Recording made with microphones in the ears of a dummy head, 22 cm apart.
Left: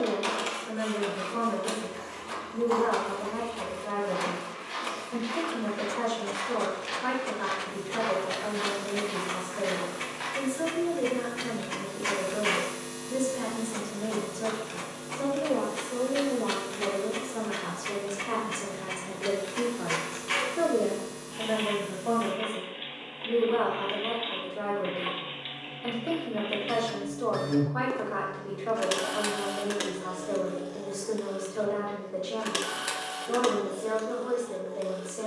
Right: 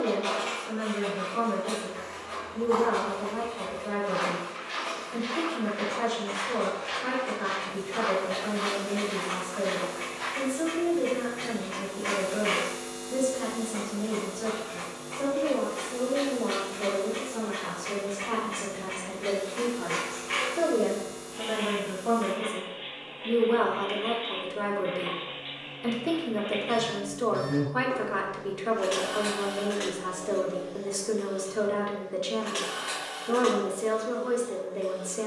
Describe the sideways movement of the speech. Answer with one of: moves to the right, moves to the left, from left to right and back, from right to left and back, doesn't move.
moves to the right.